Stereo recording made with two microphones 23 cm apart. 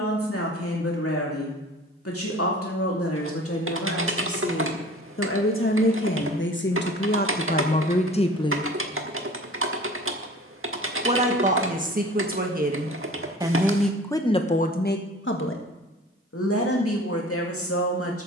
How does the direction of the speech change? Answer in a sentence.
In this clip you hear the speech go right and come back.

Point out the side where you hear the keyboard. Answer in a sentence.
You can hear the keyboard on the right.